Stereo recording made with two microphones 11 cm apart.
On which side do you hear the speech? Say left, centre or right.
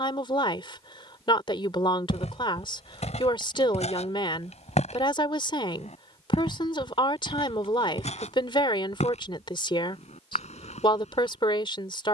left.